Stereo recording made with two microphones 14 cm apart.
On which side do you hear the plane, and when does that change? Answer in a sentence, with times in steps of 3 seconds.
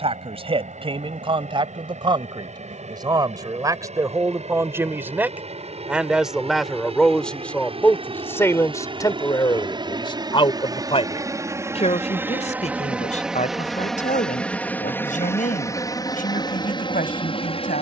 In this clip you hear the plane on the right from 0 s, in the centre from 12 s and on the left from 15 s.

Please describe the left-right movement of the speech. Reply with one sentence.
You can hear the speech move from right to left.